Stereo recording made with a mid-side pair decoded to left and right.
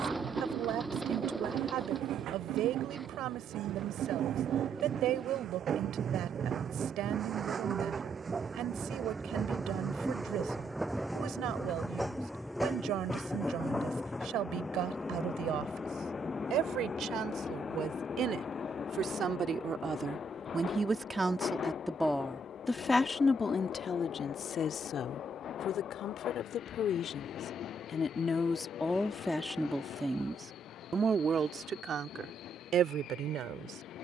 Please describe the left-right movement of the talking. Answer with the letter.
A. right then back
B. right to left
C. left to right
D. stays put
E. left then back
E.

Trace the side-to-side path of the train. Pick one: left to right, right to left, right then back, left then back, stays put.
right to left.